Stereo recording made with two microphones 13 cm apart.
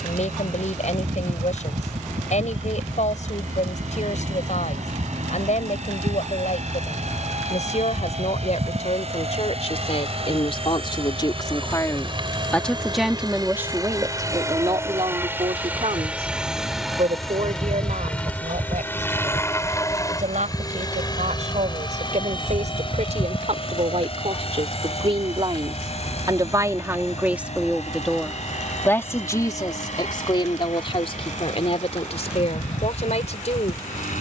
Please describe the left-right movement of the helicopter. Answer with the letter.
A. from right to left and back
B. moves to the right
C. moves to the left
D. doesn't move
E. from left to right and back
C.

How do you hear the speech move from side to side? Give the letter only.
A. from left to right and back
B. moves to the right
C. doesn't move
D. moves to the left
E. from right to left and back
A.